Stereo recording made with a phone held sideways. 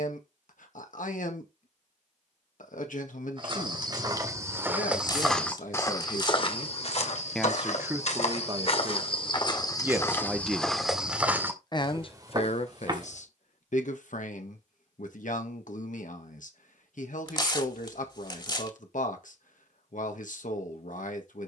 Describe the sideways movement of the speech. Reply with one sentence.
You can hear the speech go right and come back.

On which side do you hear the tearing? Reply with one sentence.
You can hear the tearing on the left.